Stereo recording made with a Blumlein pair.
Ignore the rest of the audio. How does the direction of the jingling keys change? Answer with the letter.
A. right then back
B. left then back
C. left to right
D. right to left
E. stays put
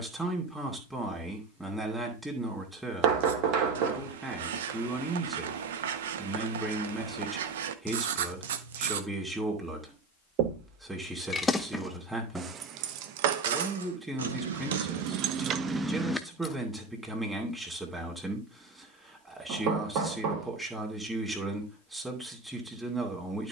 A.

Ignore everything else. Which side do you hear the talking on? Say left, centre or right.
centre.